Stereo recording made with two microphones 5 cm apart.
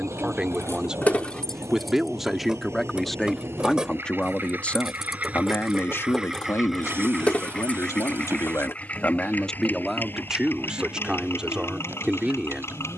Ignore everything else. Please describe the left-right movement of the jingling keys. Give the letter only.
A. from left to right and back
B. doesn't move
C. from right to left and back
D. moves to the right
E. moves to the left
A.